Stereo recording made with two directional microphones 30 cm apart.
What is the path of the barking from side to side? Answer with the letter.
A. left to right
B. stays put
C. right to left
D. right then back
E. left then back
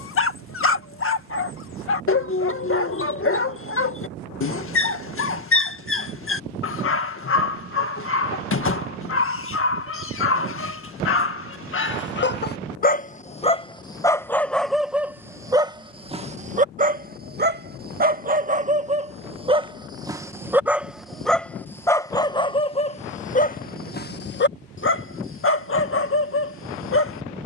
D.